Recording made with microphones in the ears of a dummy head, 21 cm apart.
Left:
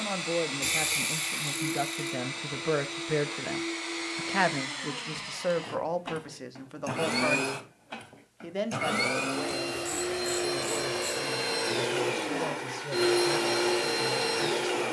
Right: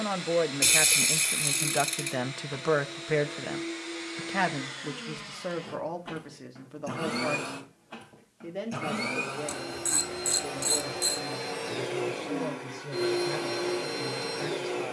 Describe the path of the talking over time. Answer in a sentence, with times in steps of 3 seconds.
In this clip you hear the talking on the right from 0 s, in the centre from 3 s and on the left from 6 s.